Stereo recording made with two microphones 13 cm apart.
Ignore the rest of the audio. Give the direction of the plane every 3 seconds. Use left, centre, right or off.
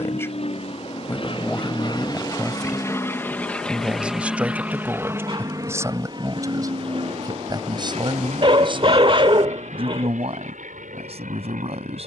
left, centre, right, right.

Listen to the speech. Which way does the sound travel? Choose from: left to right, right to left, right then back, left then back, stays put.
left to right.